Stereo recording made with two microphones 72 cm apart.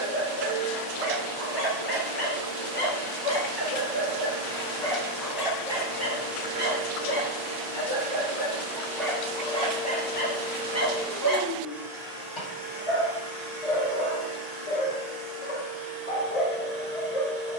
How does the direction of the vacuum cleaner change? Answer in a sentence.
In this clip you hear the vacuum cleaner go from the left side to the right.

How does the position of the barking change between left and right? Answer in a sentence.
You can hear the barking go right and come back.